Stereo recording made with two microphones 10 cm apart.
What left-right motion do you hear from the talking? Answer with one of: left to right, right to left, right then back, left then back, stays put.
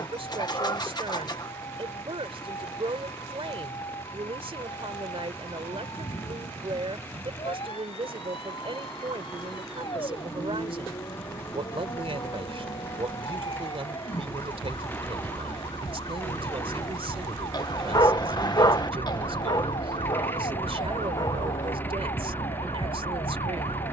stays put.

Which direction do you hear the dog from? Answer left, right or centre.
left.